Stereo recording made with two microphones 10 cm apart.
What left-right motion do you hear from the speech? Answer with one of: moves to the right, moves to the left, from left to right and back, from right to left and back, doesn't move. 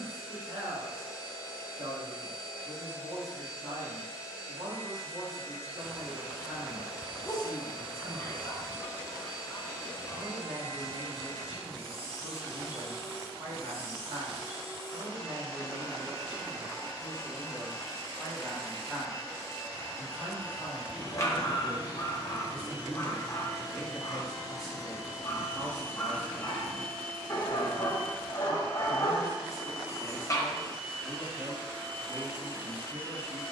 from right to left and back.